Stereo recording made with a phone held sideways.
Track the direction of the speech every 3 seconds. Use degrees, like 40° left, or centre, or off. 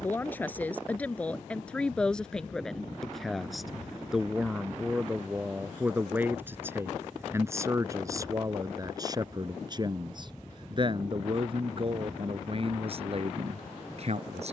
10° left, 10° right, 20° right, 40° right, 50° right.